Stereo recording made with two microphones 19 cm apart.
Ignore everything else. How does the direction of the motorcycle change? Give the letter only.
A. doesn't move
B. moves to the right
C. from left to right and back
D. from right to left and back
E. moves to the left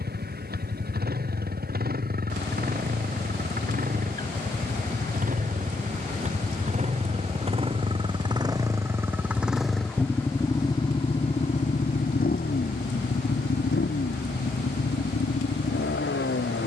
E.